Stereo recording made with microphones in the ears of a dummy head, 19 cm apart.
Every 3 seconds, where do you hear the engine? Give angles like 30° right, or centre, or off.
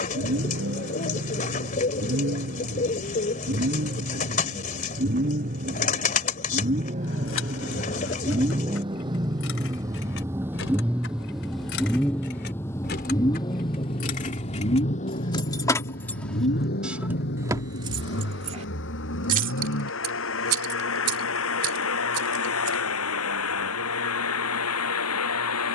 50° right, 40° right, 30° right, 10° right, 20° left, 50° left, 60° left, 70° left, 80° left.